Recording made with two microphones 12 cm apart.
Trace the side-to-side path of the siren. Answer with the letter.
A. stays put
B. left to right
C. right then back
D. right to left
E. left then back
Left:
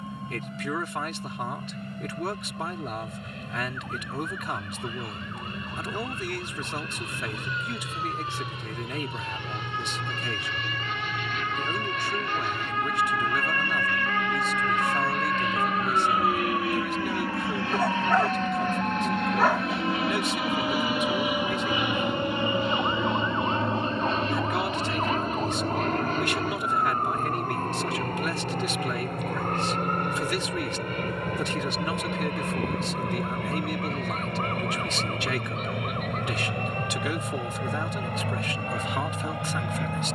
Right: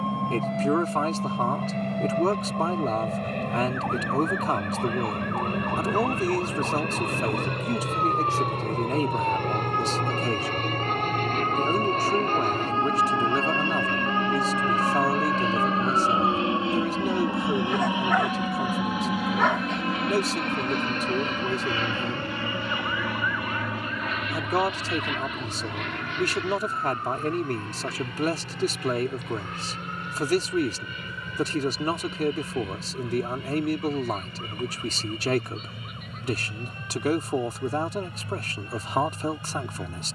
D.